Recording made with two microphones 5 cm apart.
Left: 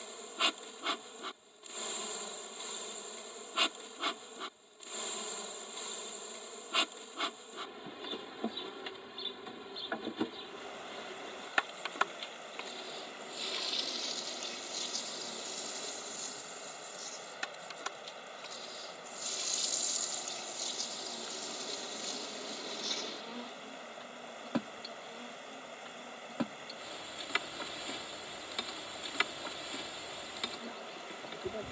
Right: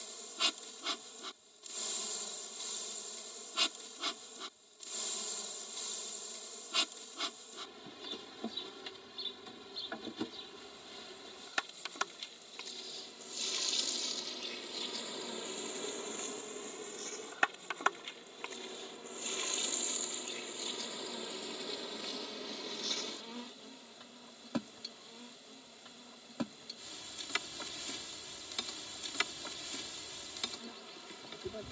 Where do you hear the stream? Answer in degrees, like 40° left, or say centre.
60° left.